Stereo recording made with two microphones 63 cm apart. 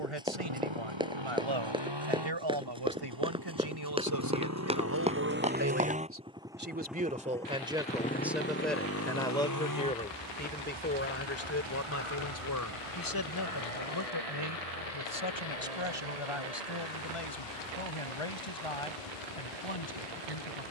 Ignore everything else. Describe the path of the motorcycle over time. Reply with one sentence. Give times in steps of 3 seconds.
You can hear the motorcycle on the right from 0 s, in the centre from 6 s and on the left from 9 s.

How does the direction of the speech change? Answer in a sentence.
In this clip you hear the speech go from the right side to the left.